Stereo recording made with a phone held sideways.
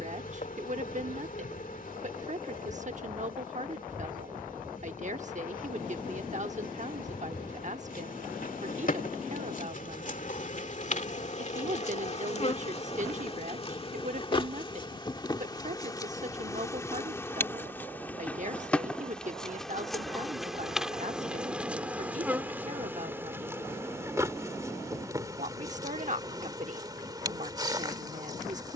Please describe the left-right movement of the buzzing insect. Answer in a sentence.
In this clip you hear the buzzing insect go from the left side to the right.